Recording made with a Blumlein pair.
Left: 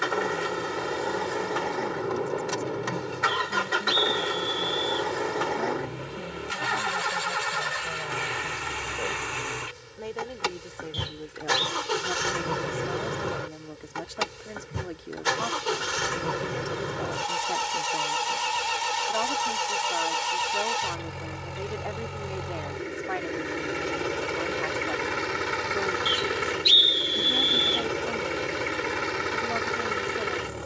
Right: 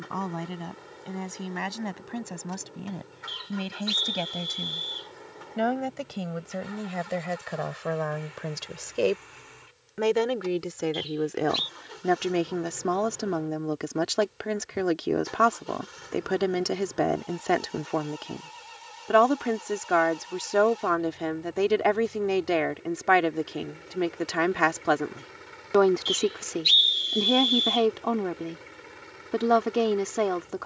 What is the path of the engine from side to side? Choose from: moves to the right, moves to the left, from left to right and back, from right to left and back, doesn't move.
doesn't move.